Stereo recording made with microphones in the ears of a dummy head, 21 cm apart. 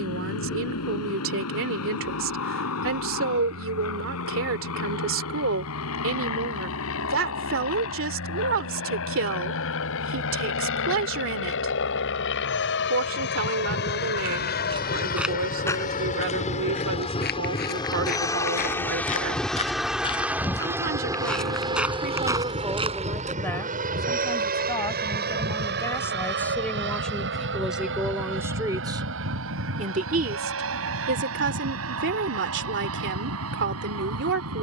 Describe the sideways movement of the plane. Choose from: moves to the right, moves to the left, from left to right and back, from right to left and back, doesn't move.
moves to the right.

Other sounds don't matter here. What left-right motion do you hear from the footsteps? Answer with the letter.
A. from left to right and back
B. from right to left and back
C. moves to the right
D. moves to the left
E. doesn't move
B.